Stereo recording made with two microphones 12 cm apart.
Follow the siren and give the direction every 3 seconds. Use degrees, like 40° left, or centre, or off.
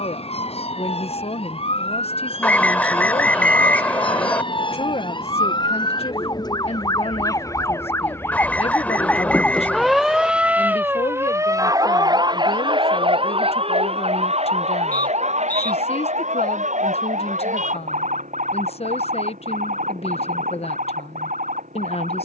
50° left, 40° left, 30° left, 10° right, 50° right, 70° right, 80° right, 80° right.